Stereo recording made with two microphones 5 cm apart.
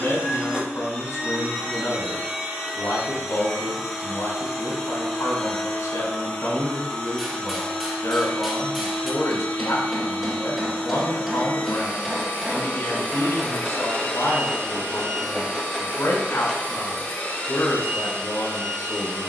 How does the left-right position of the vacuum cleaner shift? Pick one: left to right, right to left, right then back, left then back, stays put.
right to left.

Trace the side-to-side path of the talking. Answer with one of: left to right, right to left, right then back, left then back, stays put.
stays put.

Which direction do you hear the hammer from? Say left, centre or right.
centre.